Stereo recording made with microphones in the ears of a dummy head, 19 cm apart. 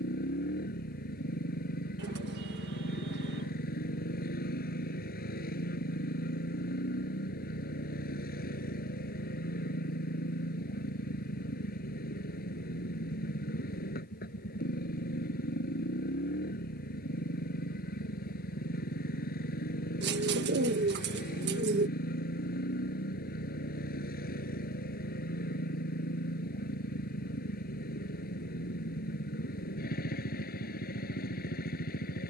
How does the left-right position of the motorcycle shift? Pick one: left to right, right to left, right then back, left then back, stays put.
stays put.